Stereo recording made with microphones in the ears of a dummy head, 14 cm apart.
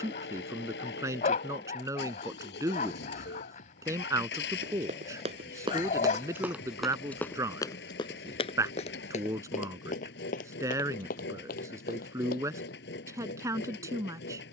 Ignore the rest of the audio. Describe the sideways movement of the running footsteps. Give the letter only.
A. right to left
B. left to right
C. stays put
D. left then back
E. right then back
A.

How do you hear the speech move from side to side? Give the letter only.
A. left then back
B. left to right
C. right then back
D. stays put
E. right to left
D.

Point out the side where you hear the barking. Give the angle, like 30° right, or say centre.
50° left.